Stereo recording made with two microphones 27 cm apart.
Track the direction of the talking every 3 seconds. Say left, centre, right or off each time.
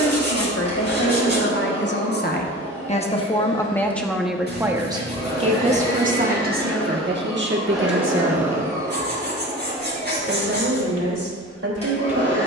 left, centre, right, right.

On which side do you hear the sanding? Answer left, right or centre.
right.